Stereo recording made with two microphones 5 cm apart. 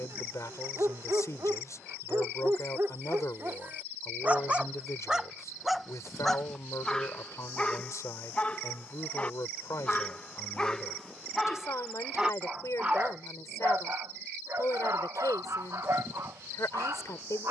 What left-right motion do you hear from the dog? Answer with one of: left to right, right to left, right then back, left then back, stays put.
left then back.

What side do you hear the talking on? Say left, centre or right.
left.